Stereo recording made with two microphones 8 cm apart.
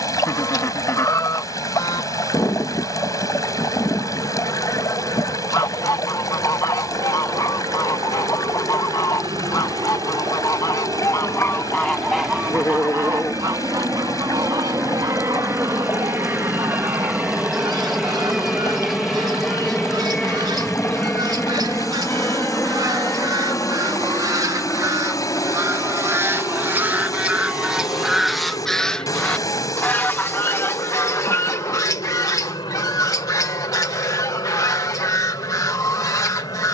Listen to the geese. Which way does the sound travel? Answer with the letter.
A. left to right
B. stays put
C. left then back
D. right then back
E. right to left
D.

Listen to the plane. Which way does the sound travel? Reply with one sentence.
In this clip you hear the plane move to the left.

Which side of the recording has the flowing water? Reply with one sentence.
In this clip you hear the flowing water on the left.